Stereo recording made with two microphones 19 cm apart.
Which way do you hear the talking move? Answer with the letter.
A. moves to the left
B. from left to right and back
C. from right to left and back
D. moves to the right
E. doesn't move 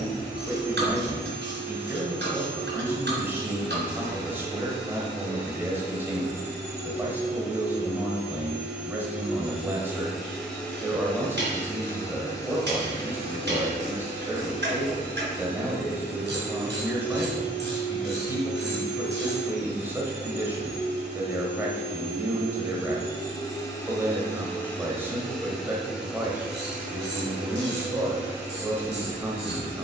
E.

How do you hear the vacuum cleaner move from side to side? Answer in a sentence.
You can hear the vacuum cleaner go left and come back.